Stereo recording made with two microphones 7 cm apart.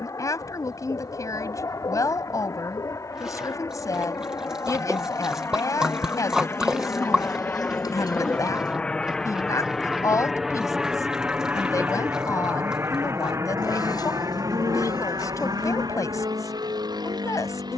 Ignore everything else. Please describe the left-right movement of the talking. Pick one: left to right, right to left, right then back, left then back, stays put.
stays put.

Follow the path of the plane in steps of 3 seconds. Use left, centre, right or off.
left, left, left, centre, right, right.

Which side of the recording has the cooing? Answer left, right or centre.
left.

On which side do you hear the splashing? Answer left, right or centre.
centre.